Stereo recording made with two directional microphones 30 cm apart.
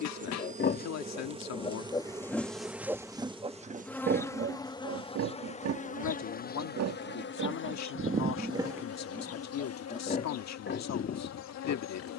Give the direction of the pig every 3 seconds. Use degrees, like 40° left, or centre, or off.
20° left, 40° right, 40° right, 30° left.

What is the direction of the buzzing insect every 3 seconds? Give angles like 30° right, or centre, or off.
20° right, 10° left, 40° left, 60° left.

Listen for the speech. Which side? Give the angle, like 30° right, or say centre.
60° left.